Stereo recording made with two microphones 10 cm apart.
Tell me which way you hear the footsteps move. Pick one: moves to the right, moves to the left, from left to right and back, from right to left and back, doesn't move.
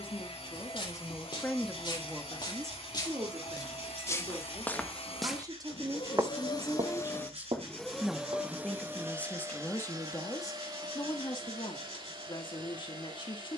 moves to the right.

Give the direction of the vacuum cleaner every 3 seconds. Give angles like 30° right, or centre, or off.
80° left, 70° left, 10° left, 40° right, 50° right.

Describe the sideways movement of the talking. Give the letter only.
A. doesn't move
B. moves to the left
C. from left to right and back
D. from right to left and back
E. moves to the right
C.